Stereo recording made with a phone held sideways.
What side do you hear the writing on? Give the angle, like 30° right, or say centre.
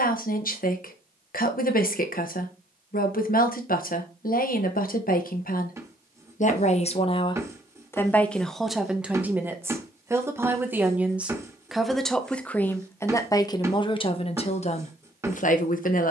20° right.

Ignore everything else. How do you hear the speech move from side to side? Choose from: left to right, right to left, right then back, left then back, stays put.
right then back.